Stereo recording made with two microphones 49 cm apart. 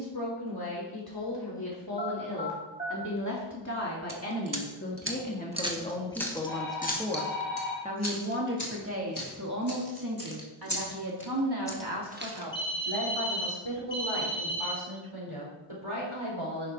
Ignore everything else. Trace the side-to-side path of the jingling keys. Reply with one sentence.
You can hear the jingling keys go left and come back.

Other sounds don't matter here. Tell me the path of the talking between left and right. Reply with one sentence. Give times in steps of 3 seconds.
In this clip you hear the talking on the left from 0 s, in the centre from 6 s and on the right from 9 s.